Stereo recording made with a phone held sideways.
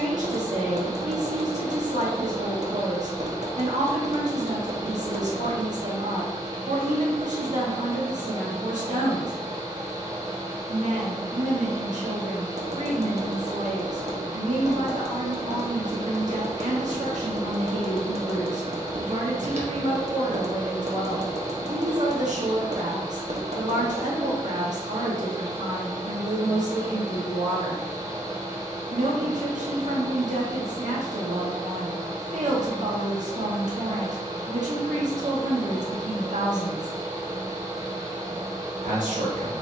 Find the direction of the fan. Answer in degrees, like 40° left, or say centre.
30° right.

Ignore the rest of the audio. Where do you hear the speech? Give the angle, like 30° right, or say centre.
70° right.